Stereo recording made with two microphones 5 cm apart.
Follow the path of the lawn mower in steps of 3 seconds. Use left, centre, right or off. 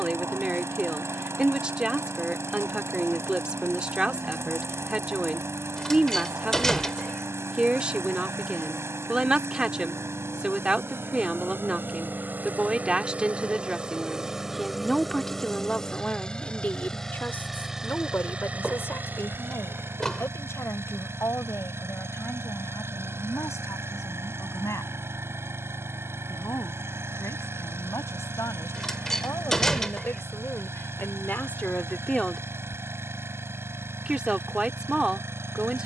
right, right, right, right, right, centre, right, right, right, right, right, right.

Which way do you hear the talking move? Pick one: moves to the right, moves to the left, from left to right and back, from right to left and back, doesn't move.
from right to left and back.